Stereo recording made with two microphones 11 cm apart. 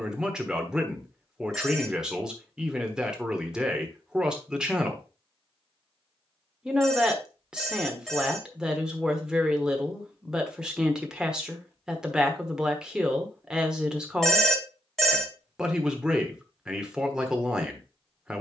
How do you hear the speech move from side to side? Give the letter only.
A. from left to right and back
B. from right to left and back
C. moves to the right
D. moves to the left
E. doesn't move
E.